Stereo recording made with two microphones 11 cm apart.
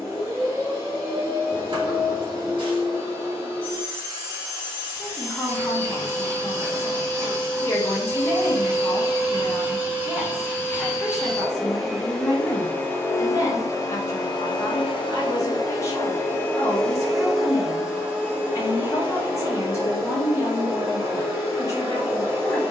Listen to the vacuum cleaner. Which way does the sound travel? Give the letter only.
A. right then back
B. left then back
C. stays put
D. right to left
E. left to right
B.